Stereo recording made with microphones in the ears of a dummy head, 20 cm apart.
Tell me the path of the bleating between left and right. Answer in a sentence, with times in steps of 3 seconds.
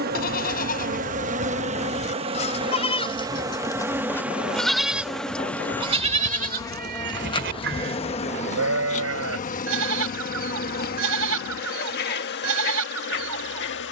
You can hear the bleating on the left from 0 s, in the centre from 3 s and on the right from 6 s.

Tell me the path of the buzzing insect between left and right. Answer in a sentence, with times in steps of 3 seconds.
You can hear the buzzing insect on the right from 0 s, in the centre from 3 s and on the left from 6 s.